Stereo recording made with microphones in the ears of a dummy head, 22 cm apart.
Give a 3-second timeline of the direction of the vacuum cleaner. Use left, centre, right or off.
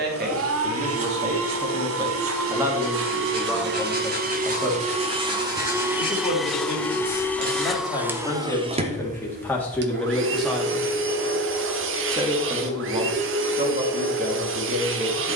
right, right, centre, right, right.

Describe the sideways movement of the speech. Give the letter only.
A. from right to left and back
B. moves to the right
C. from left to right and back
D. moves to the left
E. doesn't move
A.